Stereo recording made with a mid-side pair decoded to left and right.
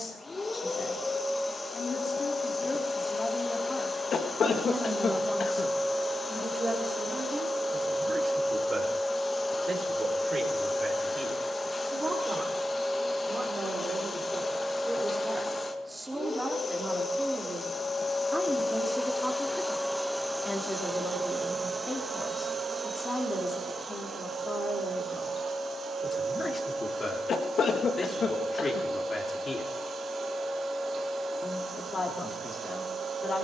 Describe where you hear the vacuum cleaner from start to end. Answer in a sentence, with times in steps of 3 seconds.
In this clip you hear the vacuum cleaner on the left from 0 s, in the centre from 18 s and on the right from 21 s.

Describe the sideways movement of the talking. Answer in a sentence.
In this clip you hear the talking go right and come back.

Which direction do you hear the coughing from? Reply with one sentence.
In this clip you hear the coughing on the left.